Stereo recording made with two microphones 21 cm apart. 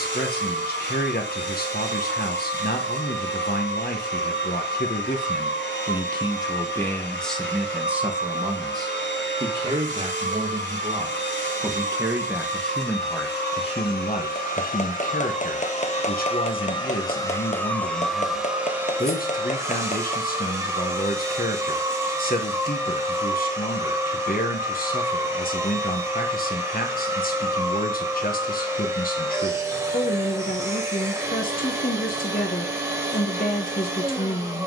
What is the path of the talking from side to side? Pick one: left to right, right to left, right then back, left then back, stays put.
right then back.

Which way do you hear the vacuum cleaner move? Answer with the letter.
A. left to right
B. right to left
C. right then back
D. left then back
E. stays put
A.